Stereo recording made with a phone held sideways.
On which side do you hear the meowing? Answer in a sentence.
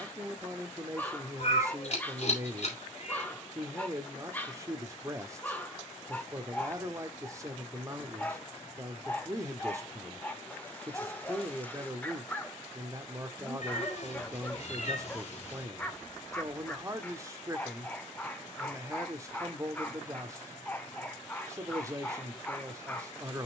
In this clip you hear the meowing on the left.